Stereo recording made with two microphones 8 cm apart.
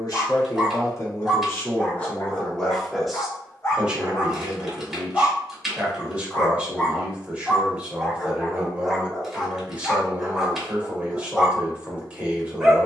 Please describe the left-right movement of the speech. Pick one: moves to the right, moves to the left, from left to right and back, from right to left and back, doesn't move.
moves to the right.